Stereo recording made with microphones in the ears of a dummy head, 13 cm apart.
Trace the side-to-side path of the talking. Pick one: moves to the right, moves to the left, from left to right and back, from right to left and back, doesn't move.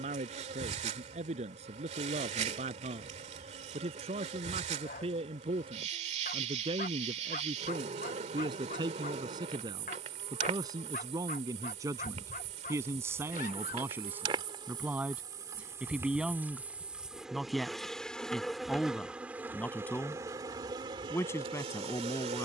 moves to the left.